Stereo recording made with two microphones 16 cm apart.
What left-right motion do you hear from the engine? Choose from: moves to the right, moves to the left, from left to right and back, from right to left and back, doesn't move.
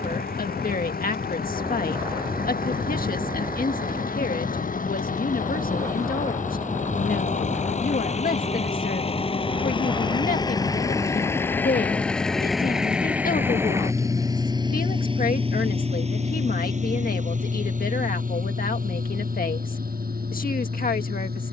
moves to the right.